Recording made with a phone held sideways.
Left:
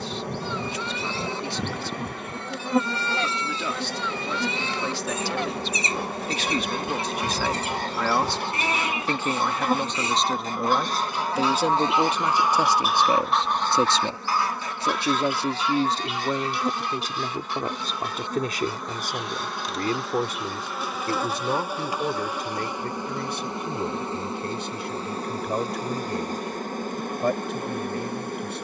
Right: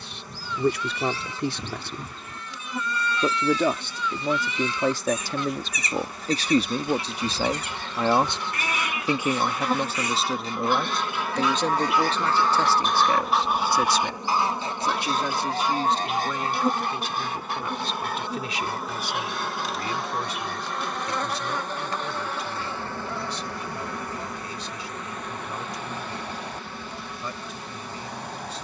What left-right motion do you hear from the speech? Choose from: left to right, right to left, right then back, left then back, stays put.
right to left.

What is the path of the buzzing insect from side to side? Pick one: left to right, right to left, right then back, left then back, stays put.
right then back.